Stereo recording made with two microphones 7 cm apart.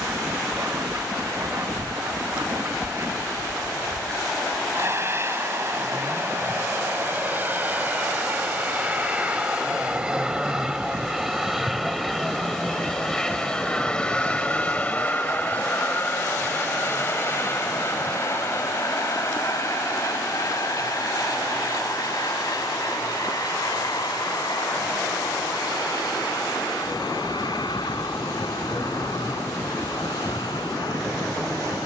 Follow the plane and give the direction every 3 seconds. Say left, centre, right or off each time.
right, right, right, centre, centre, left, left, left, left, left, left.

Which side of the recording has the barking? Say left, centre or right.
right.